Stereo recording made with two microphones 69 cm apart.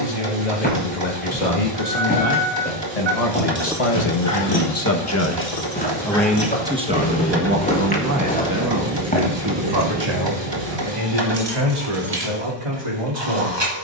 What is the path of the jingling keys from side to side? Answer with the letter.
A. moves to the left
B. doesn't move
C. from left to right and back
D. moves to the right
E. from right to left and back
E.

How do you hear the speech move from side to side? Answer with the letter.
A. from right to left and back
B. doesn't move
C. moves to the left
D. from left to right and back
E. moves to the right
E.